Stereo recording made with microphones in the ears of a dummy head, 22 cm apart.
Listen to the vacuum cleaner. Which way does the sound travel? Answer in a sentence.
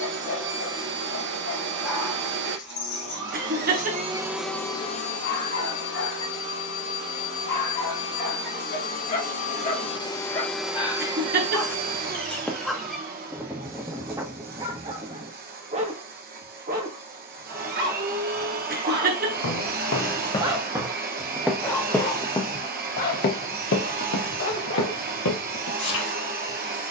In this clip you hear the vacuum cleaner go left and come back.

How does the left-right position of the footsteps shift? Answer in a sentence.
You can hear the footsteps go right and come back.